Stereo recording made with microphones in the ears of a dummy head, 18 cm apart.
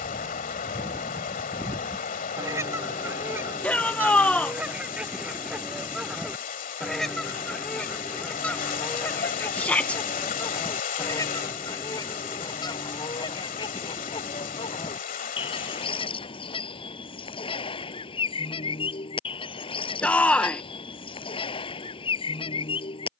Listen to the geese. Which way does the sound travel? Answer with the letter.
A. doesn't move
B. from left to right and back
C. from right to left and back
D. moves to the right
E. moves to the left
E.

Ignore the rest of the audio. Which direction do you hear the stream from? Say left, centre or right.
left.